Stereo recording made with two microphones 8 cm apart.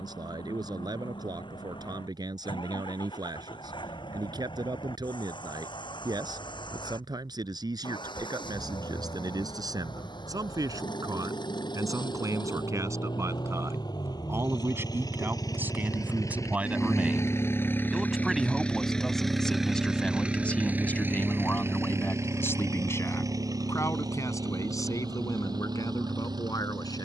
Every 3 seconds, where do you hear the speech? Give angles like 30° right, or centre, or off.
60° right, 60° right, 60° right, 50° right, 40° right, 20° right, 10° left, 30° left, 50° left.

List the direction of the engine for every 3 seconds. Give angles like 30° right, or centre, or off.
80° left, 80° left, 80° left, 70° left, 60° left, 40° left, centre, 40° right, 60° right.